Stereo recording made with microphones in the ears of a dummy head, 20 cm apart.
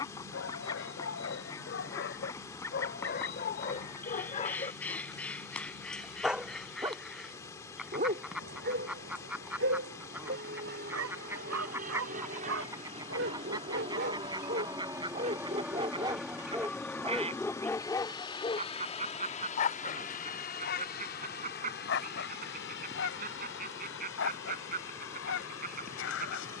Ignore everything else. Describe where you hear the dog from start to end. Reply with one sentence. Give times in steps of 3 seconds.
In this clip you hear the dog on the left from 0 s, on the right from 6 s, in the centre from 15 s and on the left from 18 s.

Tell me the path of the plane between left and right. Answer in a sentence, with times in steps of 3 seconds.
In this clip you hear the plane on the right from 0 s, in the centre from 15 s and on the left from 18 s.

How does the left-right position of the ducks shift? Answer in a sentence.
You can hear the ducks move to the right.